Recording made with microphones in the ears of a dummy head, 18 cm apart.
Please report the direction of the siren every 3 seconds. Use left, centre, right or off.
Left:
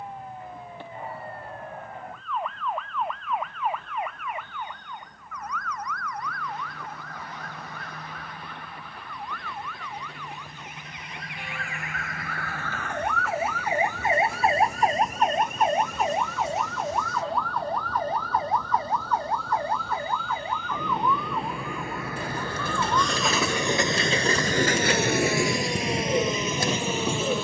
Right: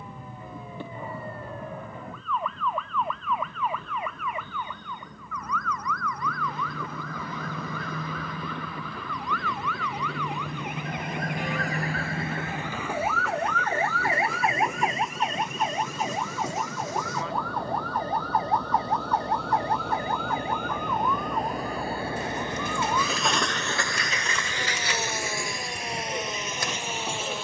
right, right, right, right, centre, left, left, left, left.